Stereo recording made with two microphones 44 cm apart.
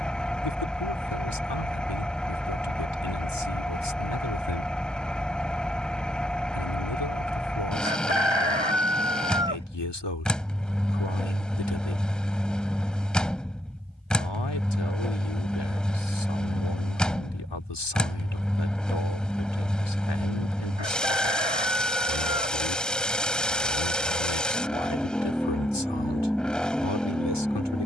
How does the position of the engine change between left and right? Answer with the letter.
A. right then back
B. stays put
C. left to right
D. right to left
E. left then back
B.